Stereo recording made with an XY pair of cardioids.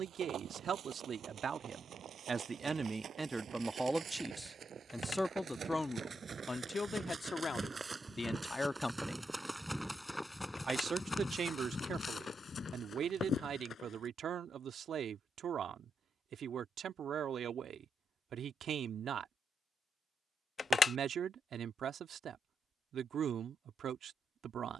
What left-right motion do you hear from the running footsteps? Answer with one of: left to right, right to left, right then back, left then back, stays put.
right to left.